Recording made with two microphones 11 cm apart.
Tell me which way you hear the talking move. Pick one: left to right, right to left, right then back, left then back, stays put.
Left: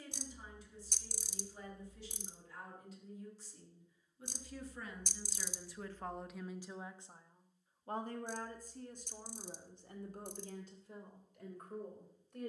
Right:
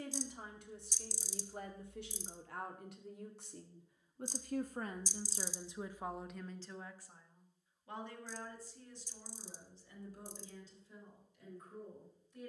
right to left.